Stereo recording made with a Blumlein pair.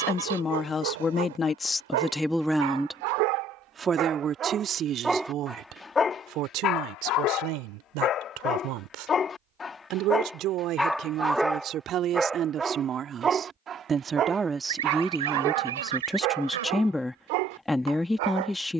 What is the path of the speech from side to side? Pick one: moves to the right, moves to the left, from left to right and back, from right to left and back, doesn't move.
from left to right and back.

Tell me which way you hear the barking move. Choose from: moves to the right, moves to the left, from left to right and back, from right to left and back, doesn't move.
from right to left and back.